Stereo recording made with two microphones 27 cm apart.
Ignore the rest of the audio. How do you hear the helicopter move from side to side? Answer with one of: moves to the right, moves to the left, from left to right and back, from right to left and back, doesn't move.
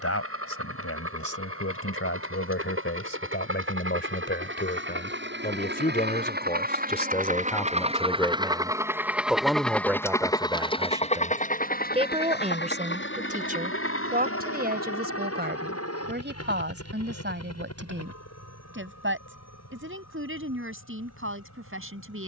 moves to the left.